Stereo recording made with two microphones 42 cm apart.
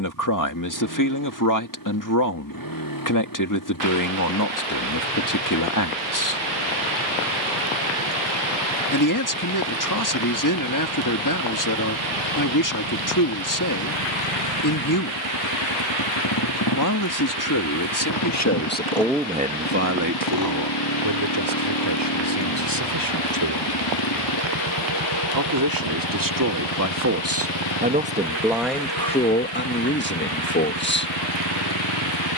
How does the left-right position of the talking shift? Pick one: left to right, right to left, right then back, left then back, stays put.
right then back.